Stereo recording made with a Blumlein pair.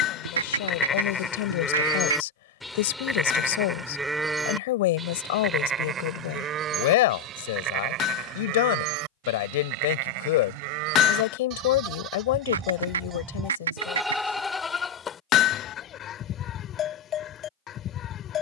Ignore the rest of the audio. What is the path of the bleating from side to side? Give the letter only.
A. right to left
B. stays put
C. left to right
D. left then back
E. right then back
E.